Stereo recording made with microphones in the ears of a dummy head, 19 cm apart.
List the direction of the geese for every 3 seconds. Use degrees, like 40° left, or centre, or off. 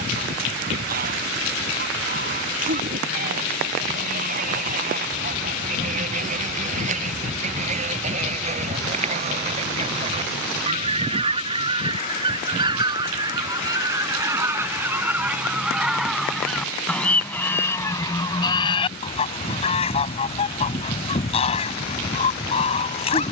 40° right, 40° right, 40° right, 30° right, 20° right, centre, 30° left, 30° left.